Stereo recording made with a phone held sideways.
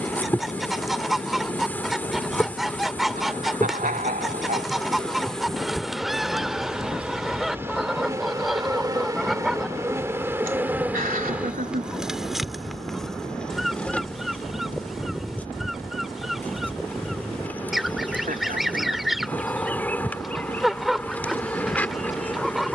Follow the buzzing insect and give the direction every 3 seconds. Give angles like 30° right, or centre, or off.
10° left, 10° left, 10° right, 10° right, centre, 10° left, 10° left, 10° left.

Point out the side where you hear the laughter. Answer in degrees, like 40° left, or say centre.
70° right.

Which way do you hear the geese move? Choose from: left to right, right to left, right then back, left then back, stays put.
stays put.